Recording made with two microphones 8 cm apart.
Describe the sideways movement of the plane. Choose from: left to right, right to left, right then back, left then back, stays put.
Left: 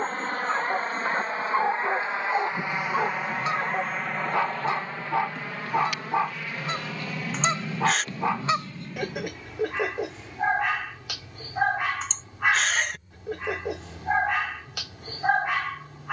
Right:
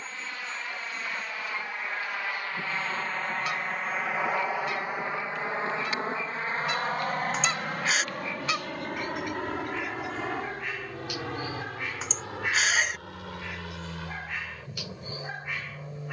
left to right.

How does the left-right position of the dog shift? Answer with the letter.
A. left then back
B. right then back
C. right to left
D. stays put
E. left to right
D.